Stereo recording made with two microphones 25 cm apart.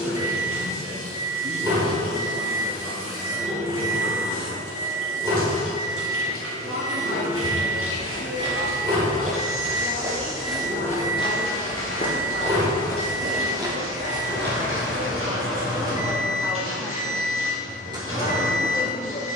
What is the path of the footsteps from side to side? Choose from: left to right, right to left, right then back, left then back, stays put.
left then back.